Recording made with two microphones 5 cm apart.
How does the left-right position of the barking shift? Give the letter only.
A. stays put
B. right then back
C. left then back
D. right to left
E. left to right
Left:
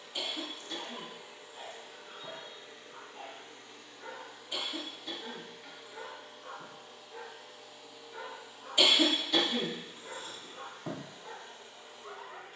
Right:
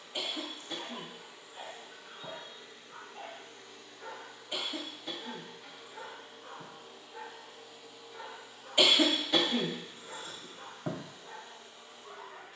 D.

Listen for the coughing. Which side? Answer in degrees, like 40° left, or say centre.
30° right.